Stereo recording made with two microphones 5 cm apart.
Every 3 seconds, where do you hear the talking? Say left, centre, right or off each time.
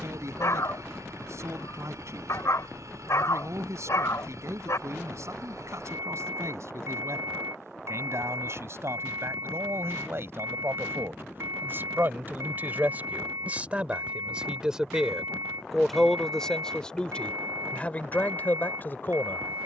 right, right, right, right, right, centre, left.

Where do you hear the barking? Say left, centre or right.
left.